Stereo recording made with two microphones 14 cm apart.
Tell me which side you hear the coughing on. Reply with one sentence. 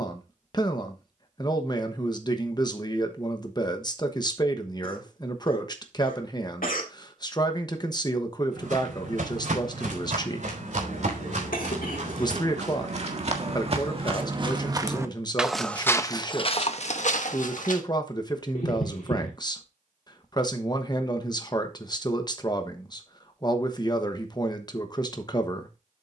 In this clip you hear the coughing on the left.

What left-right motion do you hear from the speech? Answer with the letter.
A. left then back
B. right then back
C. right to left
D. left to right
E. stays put
E.